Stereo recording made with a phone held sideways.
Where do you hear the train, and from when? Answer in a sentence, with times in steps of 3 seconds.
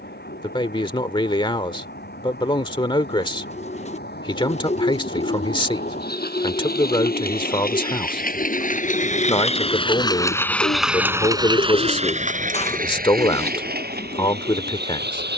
In this clip you hear the train on the left from 0 s, in the centre from 9 s and on the right from 12 s.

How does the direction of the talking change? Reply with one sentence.
You can hear the talking stay put.